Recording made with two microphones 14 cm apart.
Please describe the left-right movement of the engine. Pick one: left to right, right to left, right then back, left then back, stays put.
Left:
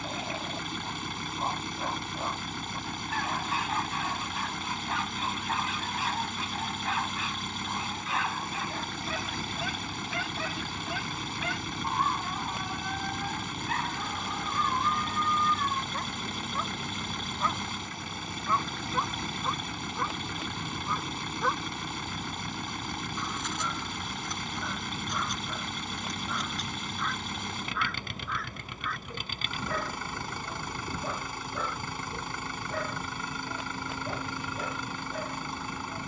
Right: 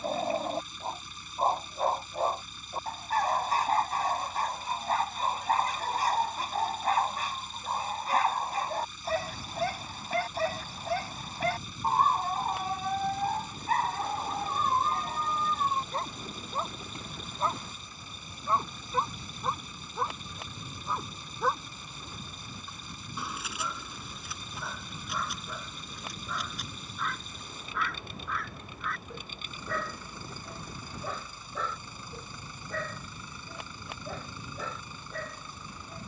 stays put.